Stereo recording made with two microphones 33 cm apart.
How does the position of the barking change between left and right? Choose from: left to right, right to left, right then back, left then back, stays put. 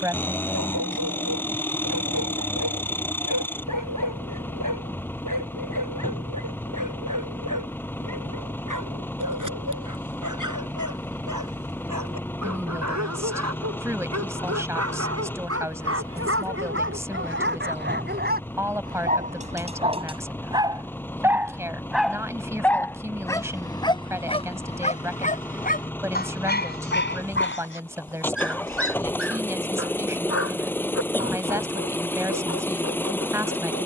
right to left.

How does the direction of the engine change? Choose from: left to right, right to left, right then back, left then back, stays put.
stays put.